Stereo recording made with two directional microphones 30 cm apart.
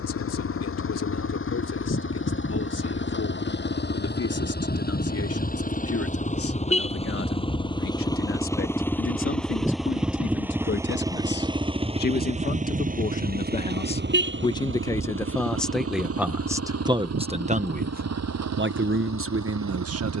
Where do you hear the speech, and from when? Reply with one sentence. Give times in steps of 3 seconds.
You can hear the speech on the left from 0 s, in the centre from 15 s and on the right from 18 s.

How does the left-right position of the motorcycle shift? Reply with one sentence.
You can hear the motorcycle move from left to right.